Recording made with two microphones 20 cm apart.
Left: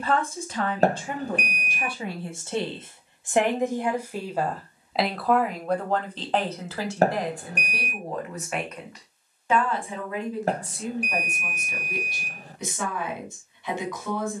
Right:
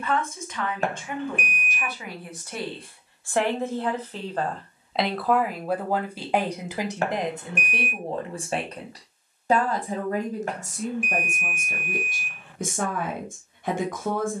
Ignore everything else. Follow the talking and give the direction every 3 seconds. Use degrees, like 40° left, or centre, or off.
30° left, 10° left, 20° right, 50° right, 50° right.